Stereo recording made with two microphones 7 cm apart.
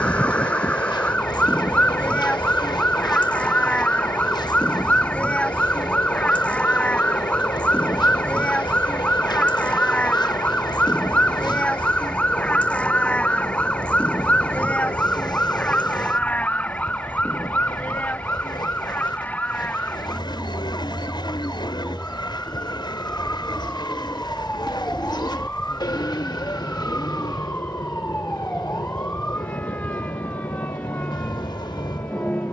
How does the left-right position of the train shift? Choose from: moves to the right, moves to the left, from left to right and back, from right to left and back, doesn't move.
doesn't move.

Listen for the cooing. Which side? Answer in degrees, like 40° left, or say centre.
70° left.